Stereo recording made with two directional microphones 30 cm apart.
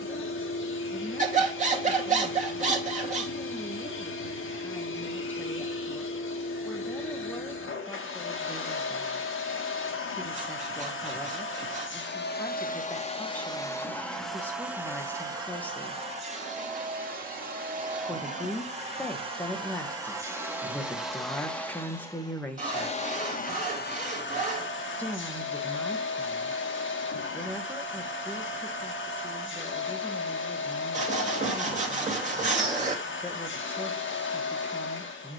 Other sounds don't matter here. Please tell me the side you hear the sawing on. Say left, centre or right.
right.